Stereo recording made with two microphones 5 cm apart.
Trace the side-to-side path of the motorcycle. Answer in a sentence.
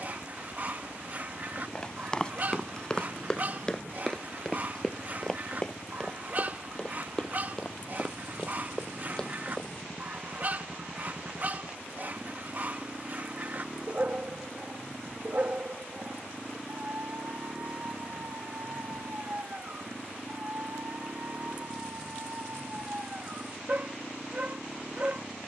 You can hear the motorcycle stay in one place.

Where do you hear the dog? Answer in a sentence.
You can hear the dog on the right.